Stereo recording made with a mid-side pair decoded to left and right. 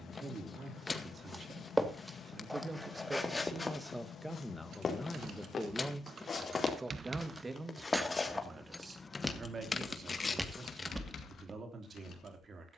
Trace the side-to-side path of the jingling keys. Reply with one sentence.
In this clip you hear the jingling keys move from right to left.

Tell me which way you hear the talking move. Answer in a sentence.
You can hear the talking go left and come back.